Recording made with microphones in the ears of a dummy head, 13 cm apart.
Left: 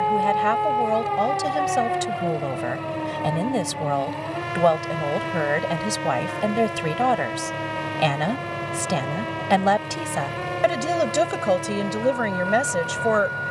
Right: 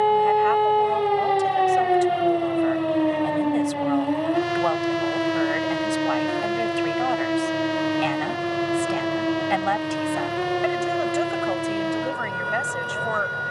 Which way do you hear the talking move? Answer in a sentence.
In this clip you hear the talking stay put.